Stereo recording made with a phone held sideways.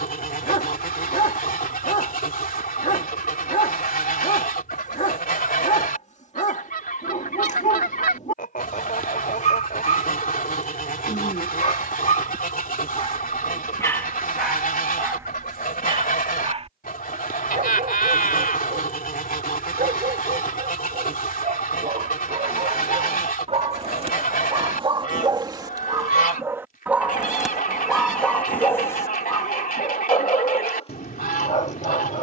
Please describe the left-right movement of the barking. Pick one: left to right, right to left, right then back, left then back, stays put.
right then back.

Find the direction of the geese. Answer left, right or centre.
left.